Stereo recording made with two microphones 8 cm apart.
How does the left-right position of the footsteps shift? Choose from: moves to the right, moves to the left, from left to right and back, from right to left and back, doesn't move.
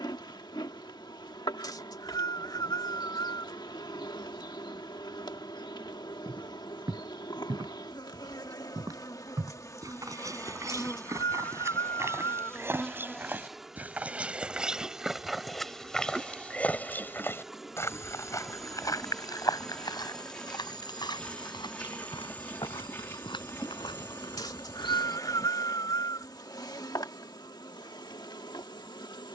moves to the left.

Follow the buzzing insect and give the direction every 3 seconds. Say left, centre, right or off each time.
left, left, left, left, centre, centre, centre, left, left, left.